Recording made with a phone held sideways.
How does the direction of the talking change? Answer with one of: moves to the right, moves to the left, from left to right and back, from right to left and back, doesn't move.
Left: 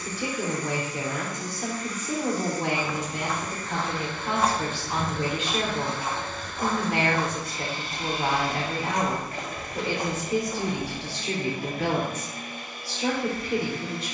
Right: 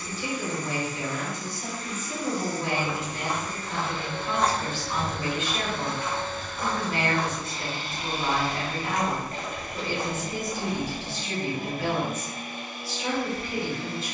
doesn't move.